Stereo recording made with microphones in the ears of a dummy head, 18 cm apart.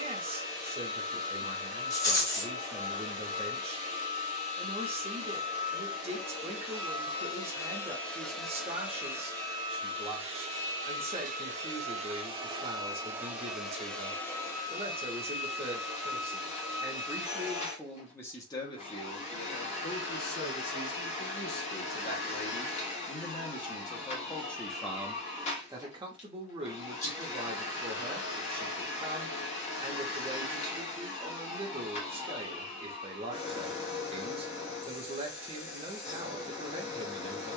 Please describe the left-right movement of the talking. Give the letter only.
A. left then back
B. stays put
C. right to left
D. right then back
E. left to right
A.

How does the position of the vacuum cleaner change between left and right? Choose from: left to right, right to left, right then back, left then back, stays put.
right then back.